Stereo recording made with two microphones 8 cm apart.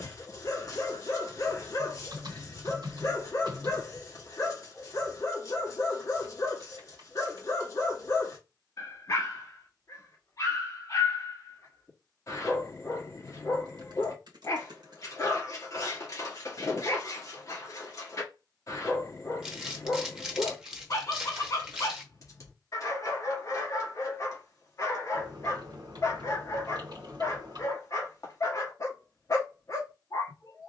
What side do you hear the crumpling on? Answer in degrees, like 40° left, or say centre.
10° right.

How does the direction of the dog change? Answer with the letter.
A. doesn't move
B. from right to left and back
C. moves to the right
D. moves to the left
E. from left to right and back
A.